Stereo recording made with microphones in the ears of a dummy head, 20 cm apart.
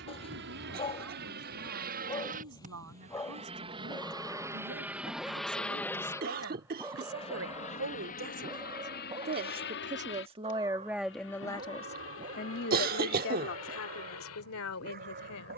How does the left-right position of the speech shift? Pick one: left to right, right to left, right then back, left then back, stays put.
right to left.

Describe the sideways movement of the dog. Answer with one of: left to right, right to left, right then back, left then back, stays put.
left to right.